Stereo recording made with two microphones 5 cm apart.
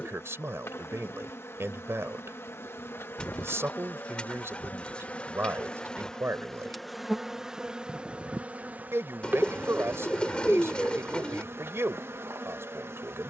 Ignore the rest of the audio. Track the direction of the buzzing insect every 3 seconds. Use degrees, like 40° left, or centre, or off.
50° left, 30° left, 10° right, 40° right, 50° right.